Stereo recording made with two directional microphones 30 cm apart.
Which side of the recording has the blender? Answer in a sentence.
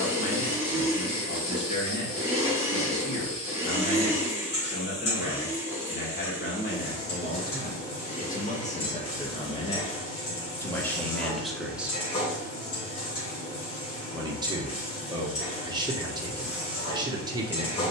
In this clip you hear the blender in the centre.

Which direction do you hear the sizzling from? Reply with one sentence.
In this clip you hear the sizzling on the left.